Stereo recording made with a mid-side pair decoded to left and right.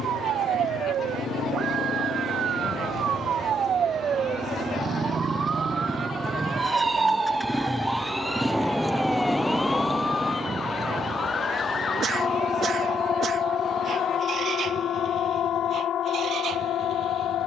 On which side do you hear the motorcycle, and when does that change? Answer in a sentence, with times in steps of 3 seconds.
In this clip you hear the motorcycle on the left from 0 s, in the centre from 6 s and on the right from 9 s.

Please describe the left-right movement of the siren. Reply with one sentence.
In this clip you hear the siren move to the left.